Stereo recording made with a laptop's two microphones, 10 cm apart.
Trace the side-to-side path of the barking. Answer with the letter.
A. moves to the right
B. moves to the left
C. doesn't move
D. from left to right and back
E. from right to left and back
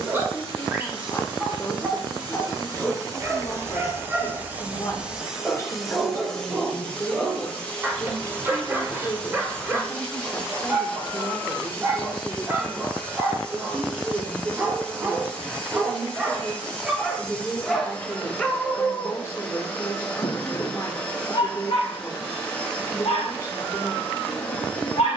B.